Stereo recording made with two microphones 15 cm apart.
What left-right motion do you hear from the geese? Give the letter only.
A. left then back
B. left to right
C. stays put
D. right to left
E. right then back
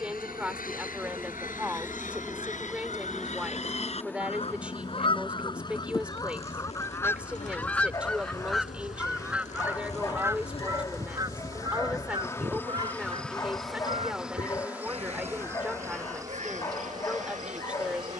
B.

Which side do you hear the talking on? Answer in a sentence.
In this clip you hear the talking in the centre.